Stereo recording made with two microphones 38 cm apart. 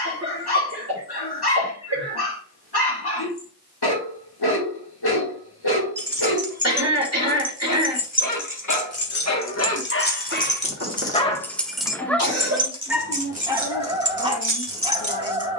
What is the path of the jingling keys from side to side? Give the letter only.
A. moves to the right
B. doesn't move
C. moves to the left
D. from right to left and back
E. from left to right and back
D.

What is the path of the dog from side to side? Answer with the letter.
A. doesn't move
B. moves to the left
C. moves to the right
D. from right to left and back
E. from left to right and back
C.